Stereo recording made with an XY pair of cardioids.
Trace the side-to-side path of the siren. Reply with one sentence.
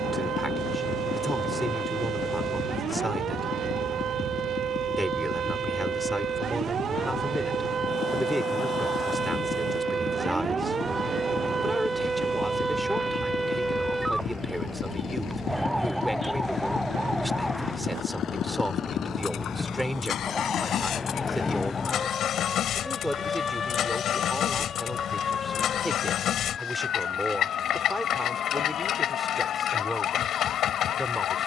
You can hear the siren go from the right side to the left.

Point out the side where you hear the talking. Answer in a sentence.
You can hear the talking in the centre.